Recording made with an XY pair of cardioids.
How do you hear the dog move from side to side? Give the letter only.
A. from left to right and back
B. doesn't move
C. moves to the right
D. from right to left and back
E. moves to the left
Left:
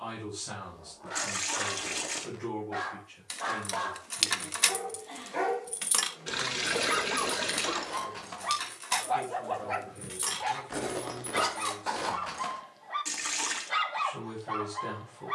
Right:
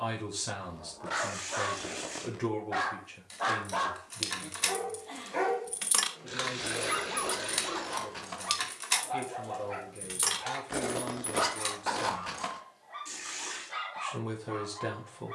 E.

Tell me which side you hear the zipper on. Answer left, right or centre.
centre.